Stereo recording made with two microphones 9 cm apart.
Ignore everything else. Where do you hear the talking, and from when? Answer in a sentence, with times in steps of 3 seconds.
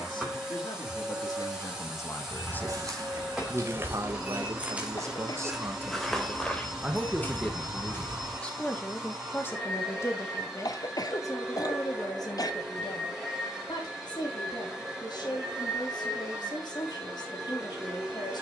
You can hear the talking on the left from 0 s, on the right from 3 s, in the centre from 6 s and on the left from 9 s.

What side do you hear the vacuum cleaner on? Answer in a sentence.
In this clip you hear the vacuum cleaner in the centre.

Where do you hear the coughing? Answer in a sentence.
In this clip you hear the coughing on the left.